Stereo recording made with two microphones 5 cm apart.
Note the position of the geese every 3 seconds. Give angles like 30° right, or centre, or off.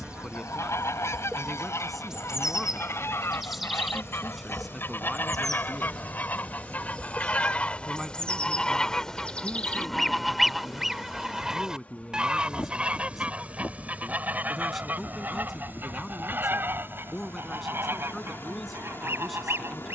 60° left, 50° left, 20° left, centre, 30° right, 40° right, 50° right.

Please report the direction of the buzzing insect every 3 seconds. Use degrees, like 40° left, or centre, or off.
20° right, centre, 10° left, 20° left, 30° left, 40° left, 40° left.